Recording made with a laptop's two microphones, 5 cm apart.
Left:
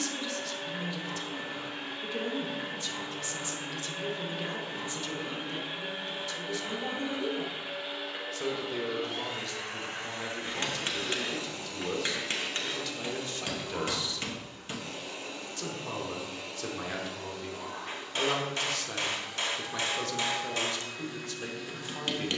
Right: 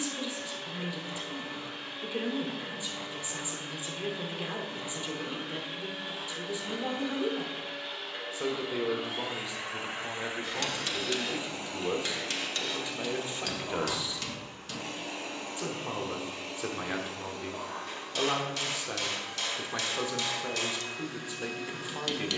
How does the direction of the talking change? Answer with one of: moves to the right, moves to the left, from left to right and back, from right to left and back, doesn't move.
doesn't move.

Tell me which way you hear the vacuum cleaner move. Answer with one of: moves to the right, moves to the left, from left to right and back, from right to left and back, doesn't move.
moves to the right.